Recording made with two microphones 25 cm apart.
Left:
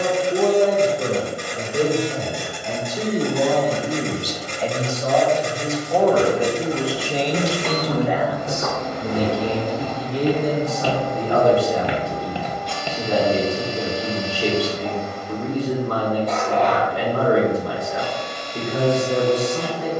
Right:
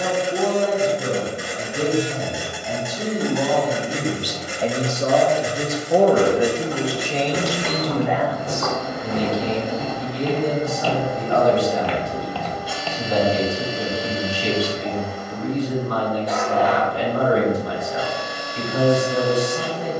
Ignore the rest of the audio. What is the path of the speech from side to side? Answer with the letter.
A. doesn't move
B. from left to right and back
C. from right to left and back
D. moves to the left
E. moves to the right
B.